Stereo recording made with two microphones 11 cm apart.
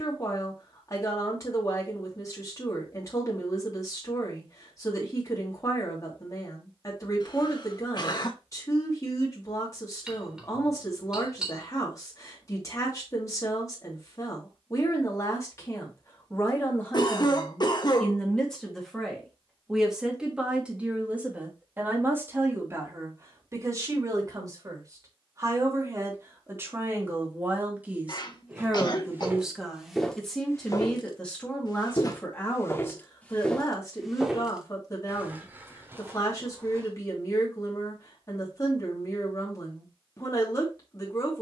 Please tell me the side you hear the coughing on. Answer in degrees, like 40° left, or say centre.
50° left.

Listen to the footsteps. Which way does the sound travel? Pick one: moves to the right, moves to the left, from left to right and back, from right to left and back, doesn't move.
from right to left and back.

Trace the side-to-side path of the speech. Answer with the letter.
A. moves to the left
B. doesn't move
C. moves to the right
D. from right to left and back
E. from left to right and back
E.